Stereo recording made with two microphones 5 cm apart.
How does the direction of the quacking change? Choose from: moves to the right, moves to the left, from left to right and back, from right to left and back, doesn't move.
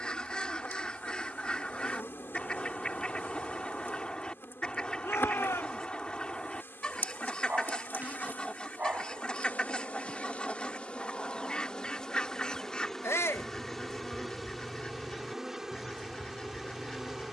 doesn't move.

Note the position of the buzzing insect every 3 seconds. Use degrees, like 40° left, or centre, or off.
50° left, 50° left, 50° left, 30° left, centre, 10° right.